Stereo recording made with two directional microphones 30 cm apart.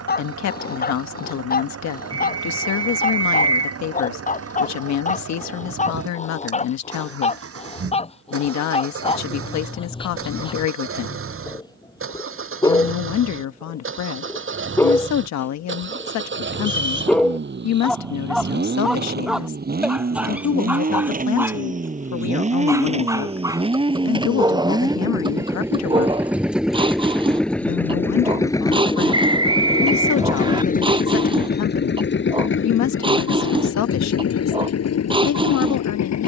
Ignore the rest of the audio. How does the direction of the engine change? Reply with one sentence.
You can hear the engine travel towards the left.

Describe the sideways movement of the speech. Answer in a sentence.
You can hear the speech stay in one place.